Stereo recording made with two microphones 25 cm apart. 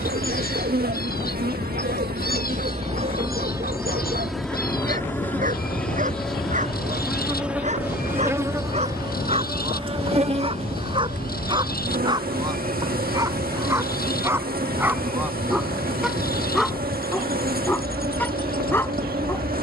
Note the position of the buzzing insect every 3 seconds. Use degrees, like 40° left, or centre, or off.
40° right, centre, 10° right, 30° right, 40° right, 40° right, 40° right.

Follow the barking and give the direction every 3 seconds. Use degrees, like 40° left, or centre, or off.
40° right, 30° right, 30° right, 20° right, 10° right, centre, 10° left.